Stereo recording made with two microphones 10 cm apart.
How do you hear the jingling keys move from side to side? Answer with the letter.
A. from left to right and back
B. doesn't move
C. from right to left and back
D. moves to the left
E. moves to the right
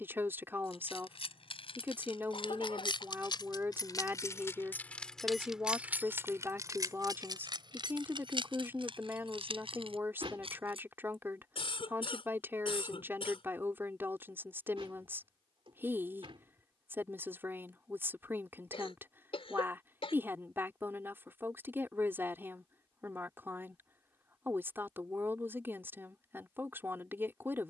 E.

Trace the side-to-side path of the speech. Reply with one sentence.
You can hear the speech stay put.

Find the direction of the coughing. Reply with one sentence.
You can hear the coughing on the left.